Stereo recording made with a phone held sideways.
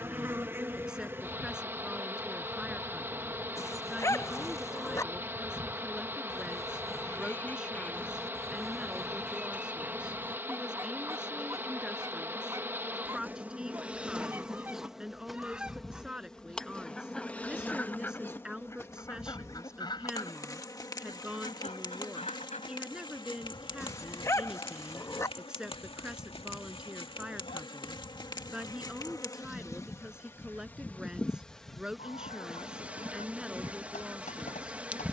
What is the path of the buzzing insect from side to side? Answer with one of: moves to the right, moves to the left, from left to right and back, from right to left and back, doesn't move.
from right to left and back.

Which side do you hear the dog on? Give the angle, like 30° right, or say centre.
20° left.